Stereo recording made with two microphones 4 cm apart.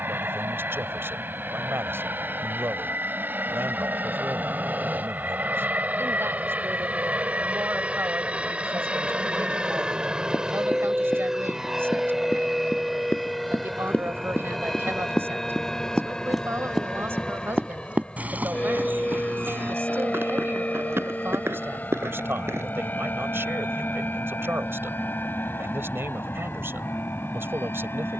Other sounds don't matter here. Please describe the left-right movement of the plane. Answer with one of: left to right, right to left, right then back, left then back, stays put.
right to left.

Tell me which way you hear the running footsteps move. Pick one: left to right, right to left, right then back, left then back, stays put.
left to right.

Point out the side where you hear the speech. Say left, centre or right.
right.